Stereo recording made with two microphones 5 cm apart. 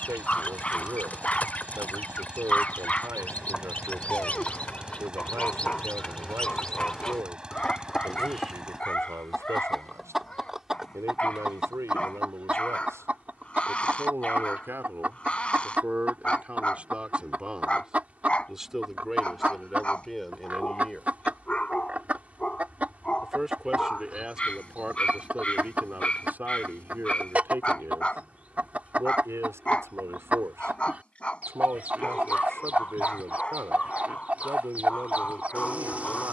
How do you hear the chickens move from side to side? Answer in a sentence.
In this clip you hear the chickens move to the right.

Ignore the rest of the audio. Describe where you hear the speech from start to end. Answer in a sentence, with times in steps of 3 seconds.
You can hear the speech on the right from 0 s, in the centre from 18 s and on the right from 24 s.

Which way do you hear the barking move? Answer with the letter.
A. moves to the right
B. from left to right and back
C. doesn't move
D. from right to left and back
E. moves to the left
C.